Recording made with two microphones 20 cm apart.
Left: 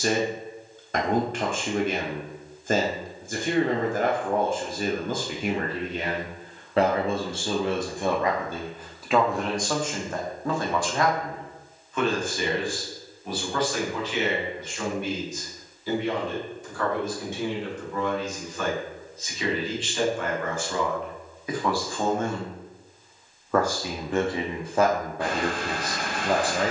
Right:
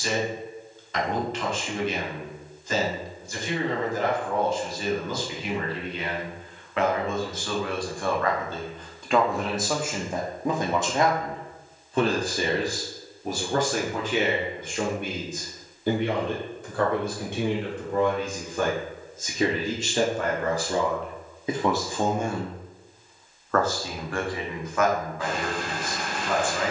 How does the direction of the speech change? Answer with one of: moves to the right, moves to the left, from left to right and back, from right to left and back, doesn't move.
from left to right and back.